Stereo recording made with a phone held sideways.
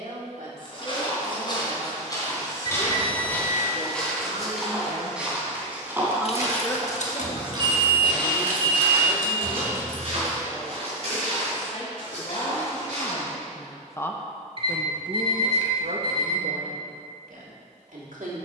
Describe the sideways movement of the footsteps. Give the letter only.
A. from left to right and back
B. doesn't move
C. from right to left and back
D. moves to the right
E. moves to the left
D.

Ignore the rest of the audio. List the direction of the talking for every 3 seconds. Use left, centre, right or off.
right, right, left, left, left, right.